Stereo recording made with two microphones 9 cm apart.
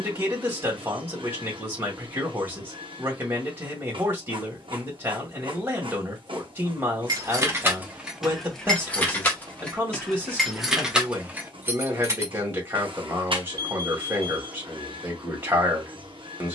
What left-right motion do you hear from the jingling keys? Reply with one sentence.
You can hear the jingling keys go left and come back.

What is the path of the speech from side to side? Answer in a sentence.
In this clip you hear the speech stay in one place.